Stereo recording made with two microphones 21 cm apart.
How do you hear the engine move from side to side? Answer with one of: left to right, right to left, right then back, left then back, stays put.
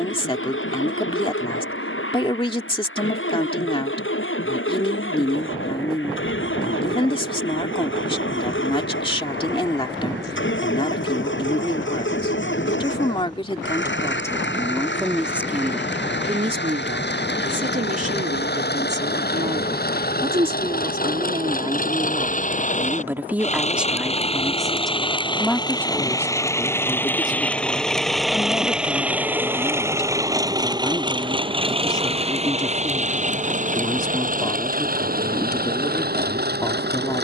left to right.